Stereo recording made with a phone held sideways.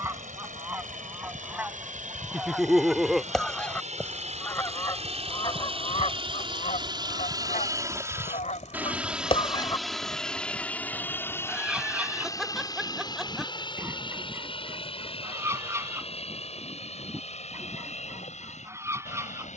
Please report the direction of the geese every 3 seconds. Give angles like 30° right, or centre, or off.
10° right, 20° left, 60° left, 10° left, 20° right, 20° right, 20° right.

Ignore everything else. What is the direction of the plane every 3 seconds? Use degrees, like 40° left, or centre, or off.
70° right, 50° right, 30° right, 10° left, 30° left, 40° left, 50° left.